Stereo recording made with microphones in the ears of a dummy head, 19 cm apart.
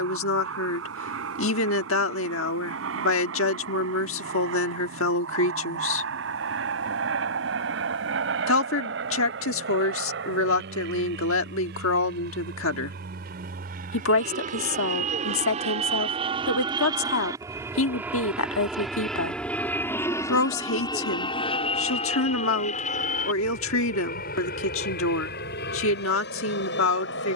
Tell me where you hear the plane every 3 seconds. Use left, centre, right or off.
right, right, right, right, right, right, centre, left, left.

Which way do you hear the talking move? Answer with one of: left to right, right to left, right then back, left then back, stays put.
stays put.